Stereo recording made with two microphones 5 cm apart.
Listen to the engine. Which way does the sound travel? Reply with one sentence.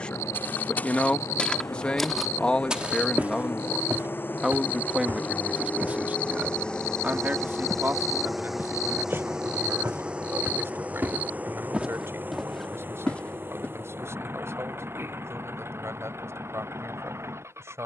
You can hear the engine move from left to right.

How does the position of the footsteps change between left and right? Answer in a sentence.
You can hear the footsteps go right and come back.